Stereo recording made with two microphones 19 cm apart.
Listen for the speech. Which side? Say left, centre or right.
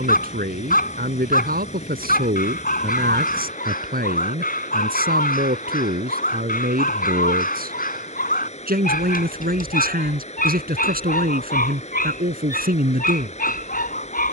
right.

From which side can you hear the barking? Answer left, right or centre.
left.